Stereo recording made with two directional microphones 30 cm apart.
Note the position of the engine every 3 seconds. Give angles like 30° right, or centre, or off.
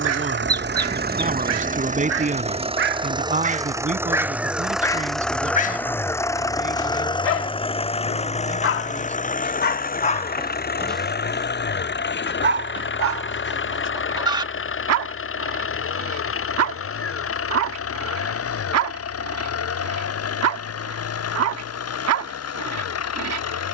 30° right, centre, 20° left, 30° left, 40° left, 50° left, 50° left, 50° left.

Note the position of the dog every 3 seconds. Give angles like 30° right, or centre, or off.
50° right, centre, 50° left, 20° left, 50° right, 60° right, 60° right, 60° right.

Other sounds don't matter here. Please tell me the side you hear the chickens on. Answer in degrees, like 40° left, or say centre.
10° right.